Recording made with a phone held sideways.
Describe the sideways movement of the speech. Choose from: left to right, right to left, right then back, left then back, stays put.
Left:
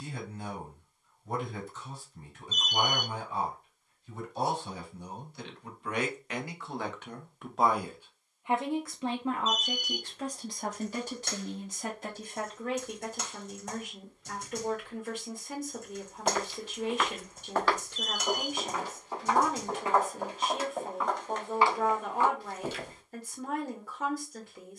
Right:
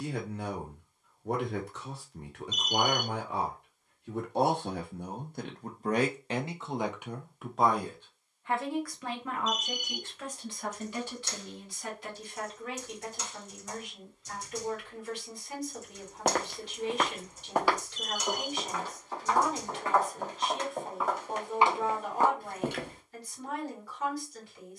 right to left.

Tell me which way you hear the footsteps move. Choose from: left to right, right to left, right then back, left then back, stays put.
left then back.